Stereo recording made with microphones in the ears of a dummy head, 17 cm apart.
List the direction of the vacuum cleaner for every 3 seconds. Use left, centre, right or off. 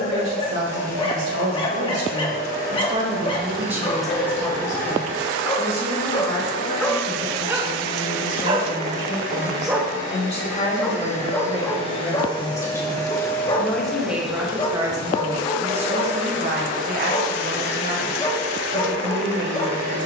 left, left, left, left, centre, right, right.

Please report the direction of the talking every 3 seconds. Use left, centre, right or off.
right, centre, left, left, centre, right, right.